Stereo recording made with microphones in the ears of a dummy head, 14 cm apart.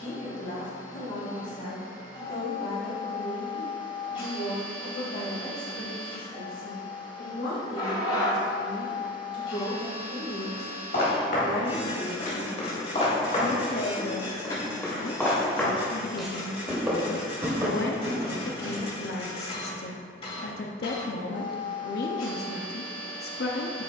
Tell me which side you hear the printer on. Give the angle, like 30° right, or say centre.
30° left.